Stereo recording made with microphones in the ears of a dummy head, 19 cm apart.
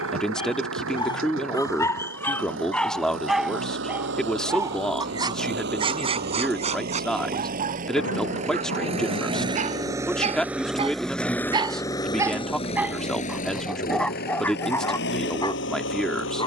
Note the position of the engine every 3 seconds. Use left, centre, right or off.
right, right, right, centre, left, left.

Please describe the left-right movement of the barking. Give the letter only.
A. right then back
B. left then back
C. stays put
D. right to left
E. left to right
A.